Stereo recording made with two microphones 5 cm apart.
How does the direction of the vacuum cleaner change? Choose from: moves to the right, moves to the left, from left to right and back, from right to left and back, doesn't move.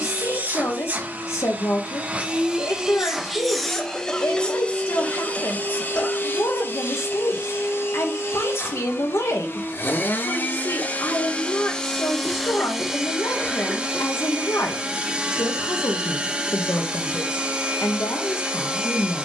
from right to left and back.